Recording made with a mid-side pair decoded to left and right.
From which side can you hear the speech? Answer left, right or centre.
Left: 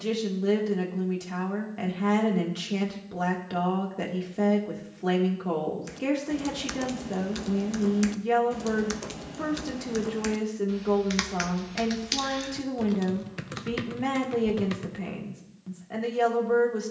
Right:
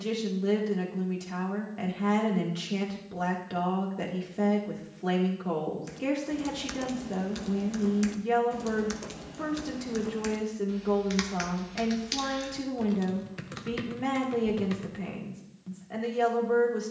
left.